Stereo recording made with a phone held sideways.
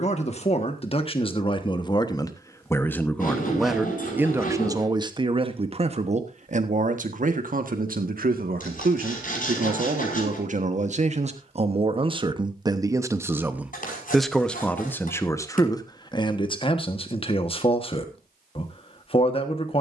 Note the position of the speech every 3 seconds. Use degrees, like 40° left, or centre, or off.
30° left, 20° right, 60° right, 50° right, 10° right, 30° left, 40° left.